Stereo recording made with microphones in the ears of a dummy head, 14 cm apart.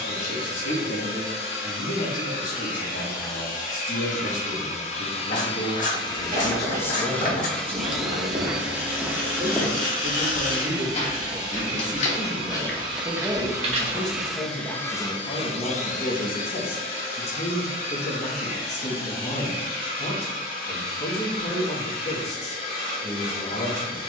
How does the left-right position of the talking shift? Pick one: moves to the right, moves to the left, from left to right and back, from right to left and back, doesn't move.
from left to right and back.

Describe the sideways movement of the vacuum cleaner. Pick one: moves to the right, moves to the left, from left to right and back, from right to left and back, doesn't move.
from left to right and back.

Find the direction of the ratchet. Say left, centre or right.
left.